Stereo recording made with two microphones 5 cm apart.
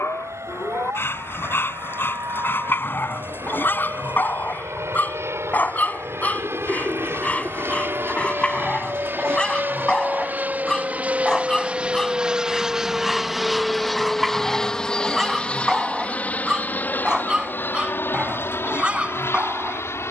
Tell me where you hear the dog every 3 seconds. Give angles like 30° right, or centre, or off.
40° left, 40° left, 20° left, 10° left, centre, 10° right, 20° right.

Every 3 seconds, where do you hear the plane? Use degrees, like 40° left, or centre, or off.
70° right, 60° right, 50° right, 30° right, centre, 30° left, 50° left.